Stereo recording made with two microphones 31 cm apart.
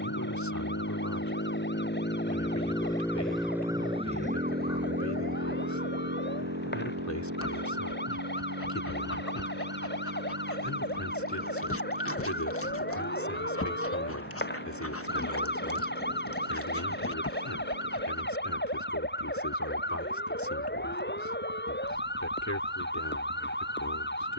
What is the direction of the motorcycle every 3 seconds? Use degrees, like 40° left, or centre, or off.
40° left, 30° right, 60° right, 70° right, 80° right, 80° right, 80° right, 80° right.